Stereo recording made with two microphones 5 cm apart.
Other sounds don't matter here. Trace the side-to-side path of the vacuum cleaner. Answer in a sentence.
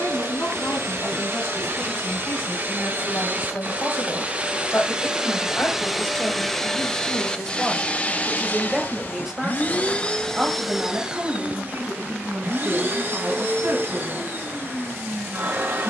You can hear the vacuum cleaner go left and come back.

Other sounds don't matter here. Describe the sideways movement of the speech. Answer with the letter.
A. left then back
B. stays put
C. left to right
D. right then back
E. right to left
C.